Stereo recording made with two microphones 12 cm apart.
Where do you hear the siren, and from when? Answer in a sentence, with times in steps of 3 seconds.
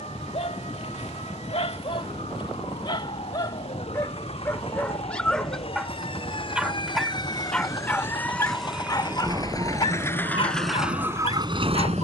In this clip you hear the siren on the left from 0 s and on the right from 9 s.